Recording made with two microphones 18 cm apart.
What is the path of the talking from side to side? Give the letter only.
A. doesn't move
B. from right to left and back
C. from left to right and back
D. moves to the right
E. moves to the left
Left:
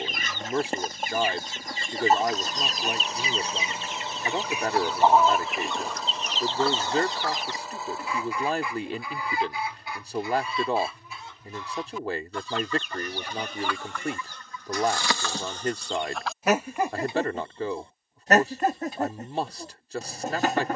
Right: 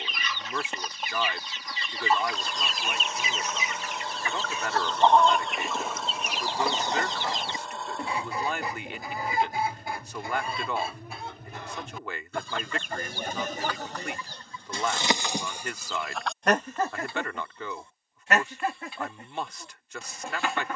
A.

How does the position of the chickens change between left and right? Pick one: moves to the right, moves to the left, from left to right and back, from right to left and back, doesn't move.
from left to right and back.